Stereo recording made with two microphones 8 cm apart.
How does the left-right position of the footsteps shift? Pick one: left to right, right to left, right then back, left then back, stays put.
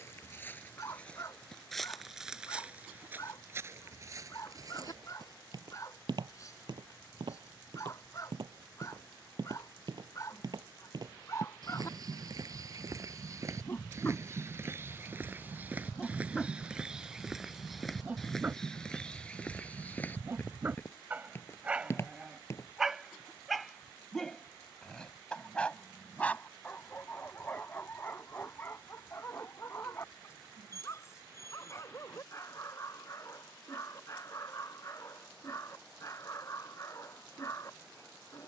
right then back.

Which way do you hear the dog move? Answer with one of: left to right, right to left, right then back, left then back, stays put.
right then back.